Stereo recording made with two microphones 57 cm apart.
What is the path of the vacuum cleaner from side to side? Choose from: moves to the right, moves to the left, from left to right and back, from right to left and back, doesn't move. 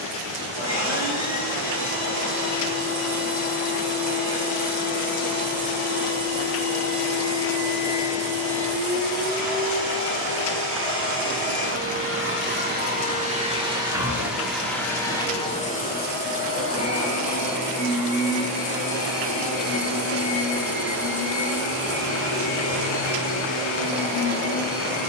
moves to the left.